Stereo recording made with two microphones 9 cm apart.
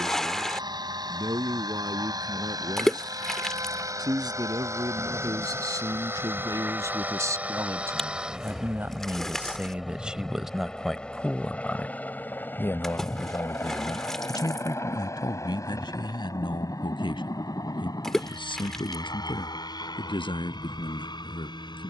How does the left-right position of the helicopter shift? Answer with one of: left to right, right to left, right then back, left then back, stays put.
right to left.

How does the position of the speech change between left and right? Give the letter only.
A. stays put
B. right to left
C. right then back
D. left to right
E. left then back
B.